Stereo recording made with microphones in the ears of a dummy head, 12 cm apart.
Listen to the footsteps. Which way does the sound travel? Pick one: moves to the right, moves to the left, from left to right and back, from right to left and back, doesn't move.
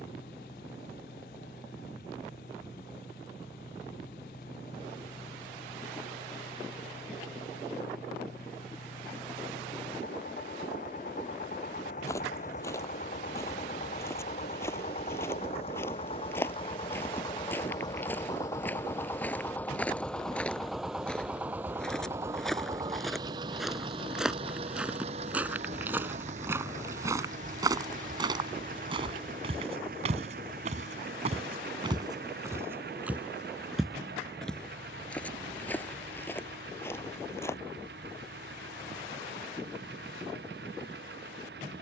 from left to right and back.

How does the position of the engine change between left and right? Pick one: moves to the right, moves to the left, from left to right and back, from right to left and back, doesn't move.
moves to the right.